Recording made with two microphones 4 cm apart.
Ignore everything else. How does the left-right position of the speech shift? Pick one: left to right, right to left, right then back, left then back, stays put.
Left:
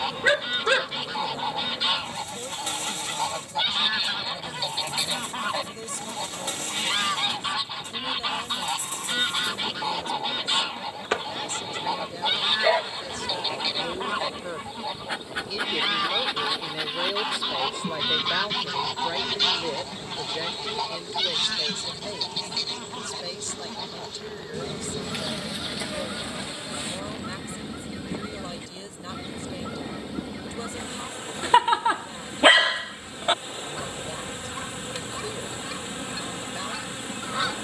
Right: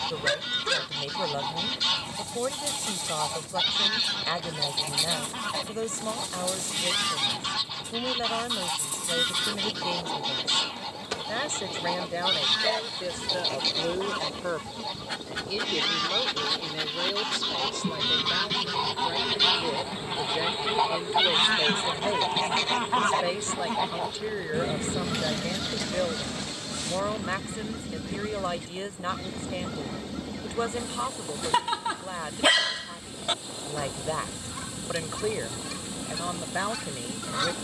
left then back.